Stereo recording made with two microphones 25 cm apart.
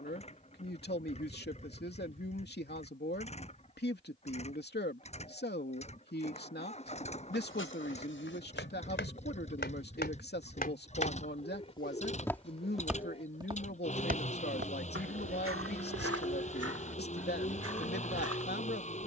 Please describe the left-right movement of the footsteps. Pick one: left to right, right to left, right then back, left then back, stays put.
left to right.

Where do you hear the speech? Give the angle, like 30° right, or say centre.
40° left.